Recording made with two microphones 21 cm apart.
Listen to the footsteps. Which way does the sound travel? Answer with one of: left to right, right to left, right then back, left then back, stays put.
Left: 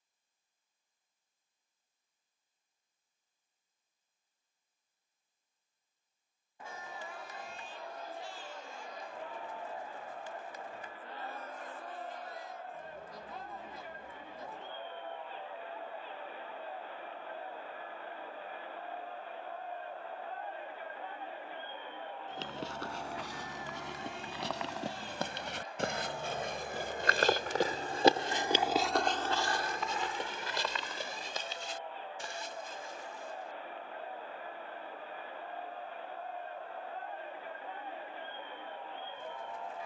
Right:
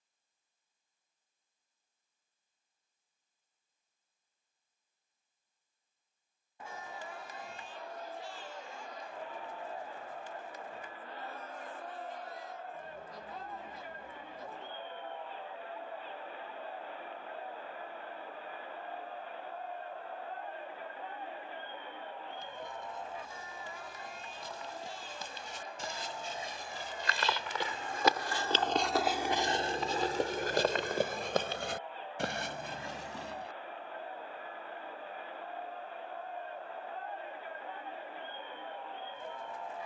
left to right.